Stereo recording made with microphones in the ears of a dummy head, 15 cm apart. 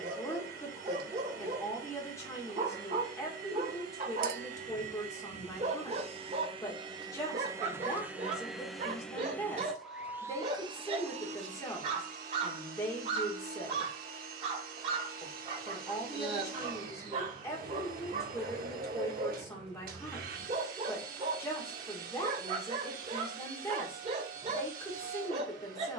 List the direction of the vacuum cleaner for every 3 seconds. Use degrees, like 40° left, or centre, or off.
70° right, 50° right, 20° right, 20° right, 60° right, 60° right, 60° right, 60° right, 60° right.